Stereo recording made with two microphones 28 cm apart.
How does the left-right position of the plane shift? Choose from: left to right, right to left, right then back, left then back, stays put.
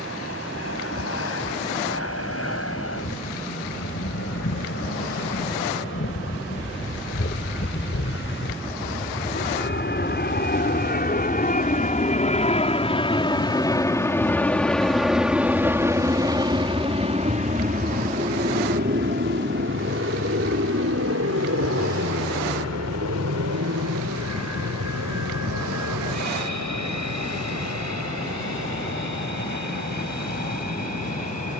left to right.